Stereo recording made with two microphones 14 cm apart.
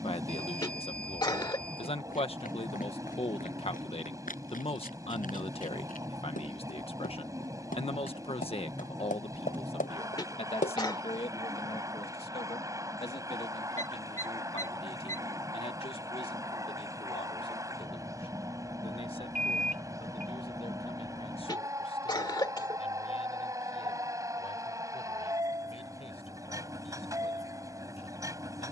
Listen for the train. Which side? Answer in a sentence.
In this clip you hear the train on the right.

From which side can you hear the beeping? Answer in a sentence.
In this clip you hear the beeping on the right.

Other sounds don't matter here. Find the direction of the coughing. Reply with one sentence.
You can hear the coughing on the left.